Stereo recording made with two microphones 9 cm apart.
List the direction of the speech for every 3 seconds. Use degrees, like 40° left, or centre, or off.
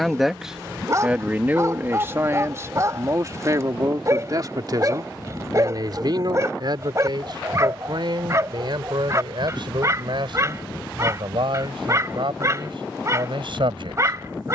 20° right, 40° right, 50° right, 60° right, 60° right.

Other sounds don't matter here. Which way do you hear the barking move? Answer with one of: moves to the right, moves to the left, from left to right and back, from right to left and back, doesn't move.
doesn't move.